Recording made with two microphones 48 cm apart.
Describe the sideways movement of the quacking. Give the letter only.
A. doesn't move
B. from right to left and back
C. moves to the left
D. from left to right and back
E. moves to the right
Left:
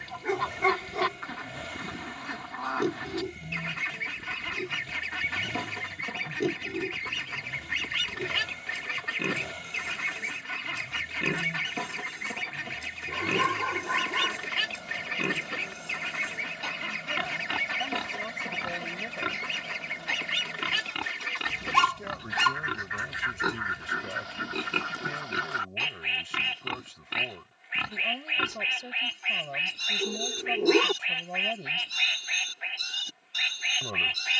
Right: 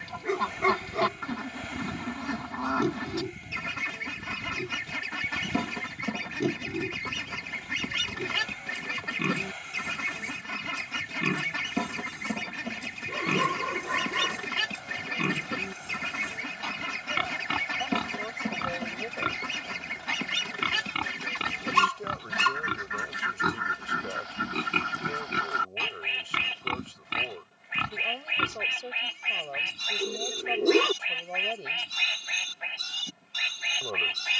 A.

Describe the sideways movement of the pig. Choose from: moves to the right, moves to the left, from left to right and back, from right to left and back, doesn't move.
doesn't move.